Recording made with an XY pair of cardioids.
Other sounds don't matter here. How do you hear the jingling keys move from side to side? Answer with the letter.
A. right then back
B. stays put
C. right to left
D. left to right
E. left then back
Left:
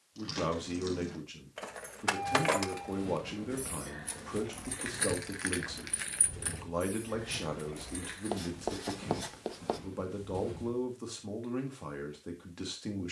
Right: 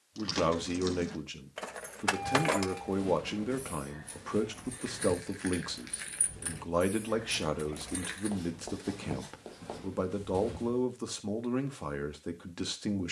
E.